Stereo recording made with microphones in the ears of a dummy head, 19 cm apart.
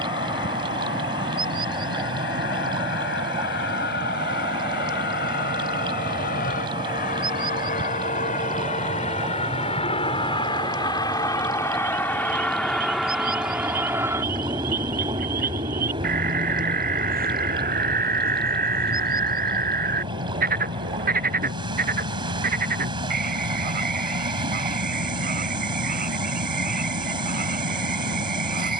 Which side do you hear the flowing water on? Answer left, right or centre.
right.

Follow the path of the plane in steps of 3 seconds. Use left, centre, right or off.
left, left, left, left, centre, right, right, right, right, right.